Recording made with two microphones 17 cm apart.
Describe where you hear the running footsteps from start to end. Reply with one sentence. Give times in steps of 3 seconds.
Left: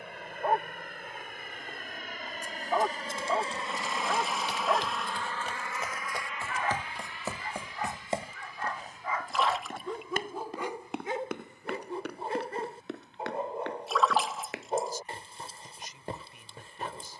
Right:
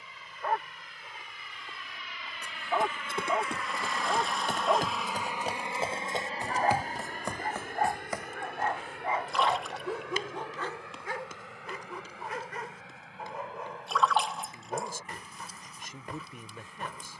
In this clip you hear the running footsteps on the right from 0 s, in the centre from 6 s, on the left from 9 s and not at all from 15 s.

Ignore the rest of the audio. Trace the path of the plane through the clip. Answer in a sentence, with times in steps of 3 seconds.
In this clip you hear the plane on the left from 0 s, in the centre from 3 s and on the right from 6 s.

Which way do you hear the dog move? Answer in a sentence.
In this clip you hear the dog go right and come back.